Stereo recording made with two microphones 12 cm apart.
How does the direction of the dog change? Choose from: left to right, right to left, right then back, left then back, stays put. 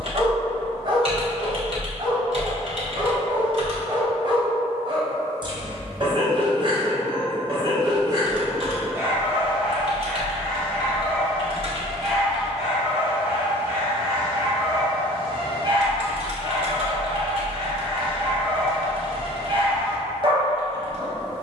left then back.